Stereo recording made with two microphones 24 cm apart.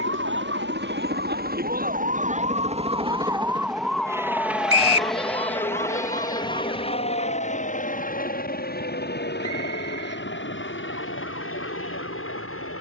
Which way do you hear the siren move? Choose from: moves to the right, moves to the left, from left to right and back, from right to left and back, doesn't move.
moves to the left.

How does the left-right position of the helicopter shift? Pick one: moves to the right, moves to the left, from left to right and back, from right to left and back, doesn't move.
moves to the left.